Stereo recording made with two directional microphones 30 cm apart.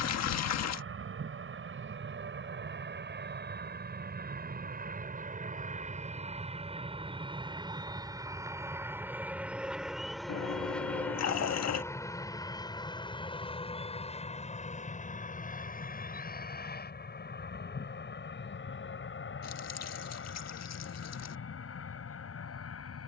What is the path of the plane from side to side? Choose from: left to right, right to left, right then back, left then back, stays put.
right to left.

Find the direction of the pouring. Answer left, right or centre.
left.